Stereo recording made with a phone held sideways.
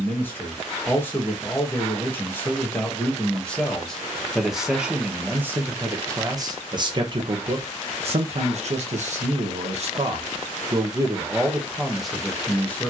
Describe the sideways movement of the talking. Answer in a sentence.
You can hear the talking go right and come back.